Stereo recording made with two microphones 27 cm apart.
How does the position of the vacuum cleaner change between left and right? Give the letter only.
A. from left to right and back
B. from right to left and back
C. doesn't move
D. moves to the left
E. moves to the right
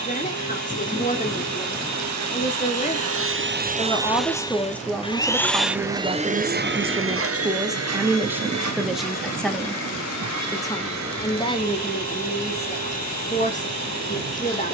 B.